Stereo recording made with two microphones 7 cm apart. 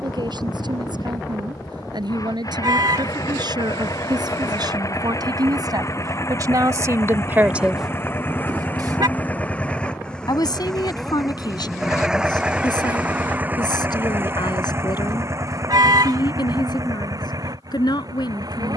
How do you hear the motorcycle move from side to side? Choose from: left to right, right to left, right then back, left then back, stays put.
left to right.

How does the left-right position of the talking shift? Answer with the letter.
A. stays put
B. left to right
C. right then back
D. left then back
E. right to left
E.